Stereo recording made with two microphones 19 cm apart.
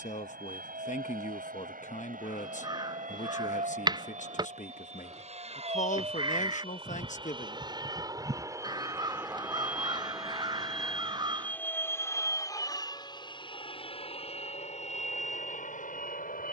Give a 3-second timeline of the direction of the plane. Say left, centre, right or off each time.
right, right, right, centre, left, left.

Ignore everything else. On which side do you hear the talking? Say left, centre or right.
left.